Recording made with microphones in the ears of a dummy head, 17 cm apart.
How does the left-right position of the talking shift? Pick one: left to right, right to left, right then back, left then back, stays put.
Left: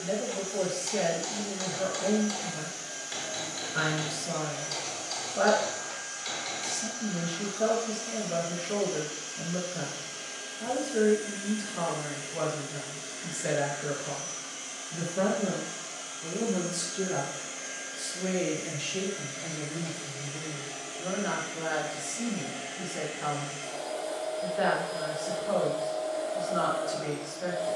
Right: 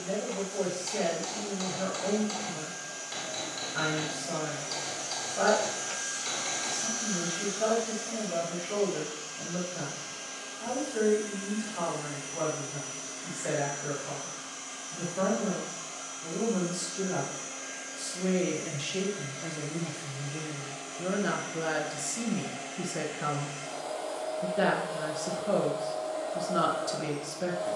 left to right.